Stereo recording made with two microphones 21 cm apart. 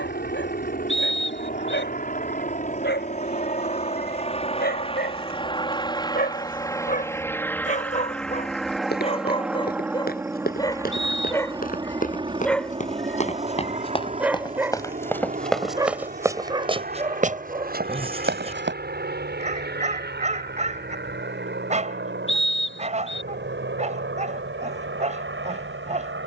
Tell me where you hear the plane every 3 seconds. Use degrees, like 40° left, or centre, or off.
50° left, 30° left, 10° left, 10° right, 30° right, 40° right, 50° right, 50° right, 60° right.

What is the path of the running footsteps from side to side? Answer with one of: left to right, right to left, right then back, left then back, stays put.
left to right.